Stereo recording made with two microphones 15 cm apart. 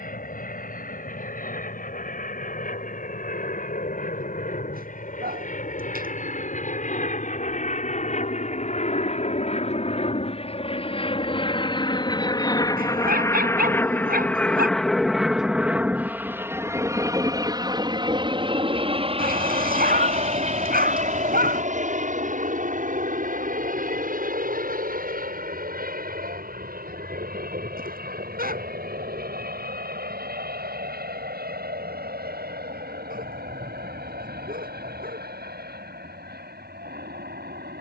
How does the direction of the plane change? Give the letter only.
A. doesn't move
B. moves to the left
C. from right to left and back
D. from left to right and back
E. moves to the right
E.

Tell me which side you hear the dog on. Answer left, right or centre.
right.